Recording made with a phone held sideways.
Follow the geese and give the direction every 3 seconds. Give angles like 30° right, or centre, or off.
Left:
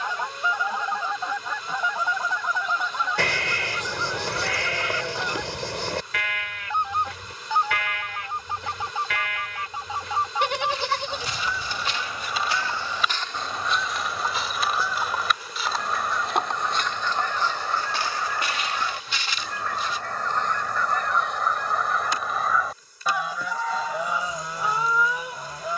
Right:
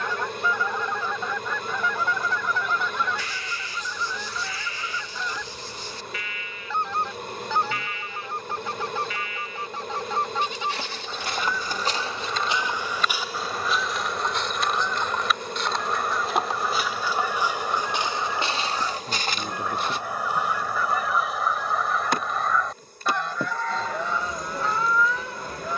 20° left, 20° left, 20° left, 10° left, centre, 10° right, 10° right, centre, 10° left.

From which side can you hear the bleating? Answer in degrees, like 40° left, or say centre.
80° left.